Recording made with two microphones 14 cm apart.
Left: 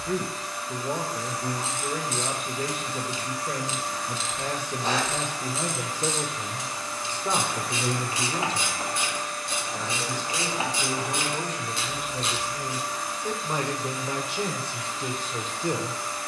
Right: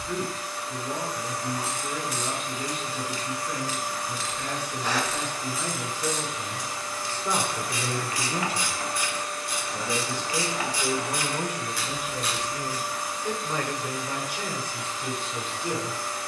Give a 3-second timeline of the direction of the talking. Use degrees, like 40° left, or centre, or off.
50° left, 50° left, 10° left, 20° right, 20° left, 40° left.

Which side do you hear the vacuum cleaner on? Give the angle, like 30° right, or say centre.
centre.